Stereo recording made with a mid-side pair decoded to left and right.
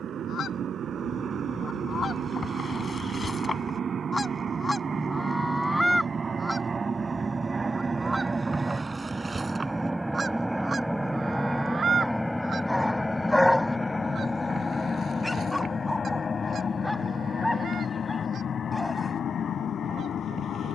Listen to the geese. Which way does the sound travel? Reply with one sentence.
You can hear the geese move to the right.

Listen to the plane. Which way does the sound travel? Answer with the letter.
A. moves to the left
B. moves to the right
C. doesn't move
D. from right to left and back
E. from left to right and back
A.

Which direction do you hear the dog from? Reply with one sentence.
You can hear the dog in the centre.